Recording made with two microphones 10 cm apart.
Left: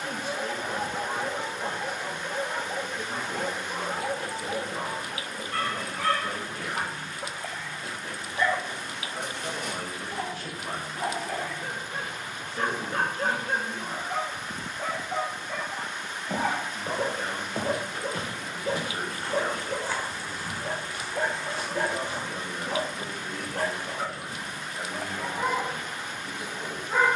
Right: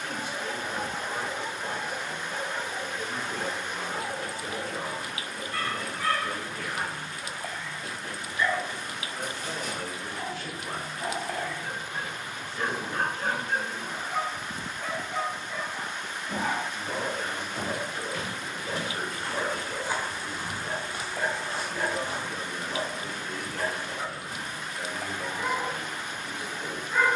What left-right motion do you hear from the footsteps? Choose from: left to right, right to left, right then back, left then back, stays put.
left to right.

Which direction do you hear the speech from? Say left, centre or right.
left.